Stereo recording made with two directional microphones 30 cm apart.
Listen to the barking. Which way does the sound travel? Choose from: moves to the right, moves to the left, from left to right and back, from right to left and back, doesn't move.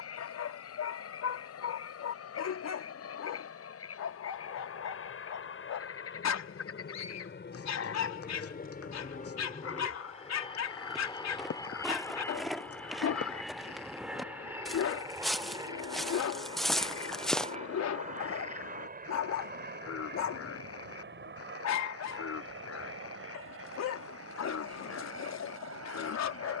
doesn't move.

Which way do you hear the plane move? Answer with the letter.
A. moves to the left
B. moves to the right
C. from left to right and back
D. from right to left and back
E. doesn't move
B.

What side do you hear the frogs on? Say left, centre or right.
left.